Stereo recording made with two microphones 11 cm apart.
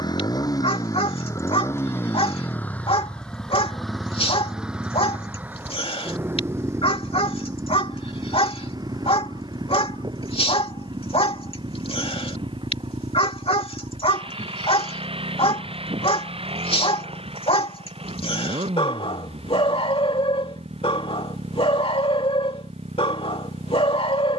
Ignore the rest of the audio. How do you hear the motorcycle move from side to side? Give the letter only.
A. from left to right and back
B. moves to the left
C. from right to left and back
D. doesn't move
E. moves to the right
E.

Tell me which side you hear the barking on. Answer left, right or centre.
left.